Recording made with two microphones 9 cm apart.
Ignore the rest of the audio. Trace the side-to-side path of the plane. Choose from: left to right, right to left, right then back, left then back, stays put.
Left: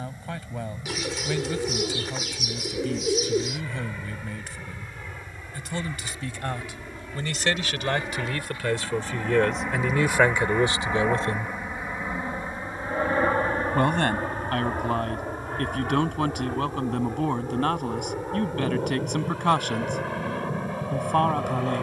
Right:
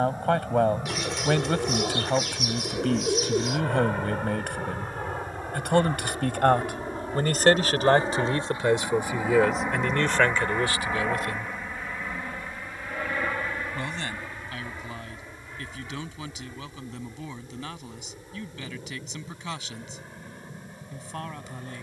right to left.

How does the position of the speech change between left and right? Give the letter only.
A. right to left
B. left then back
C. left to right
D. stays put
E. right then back
A.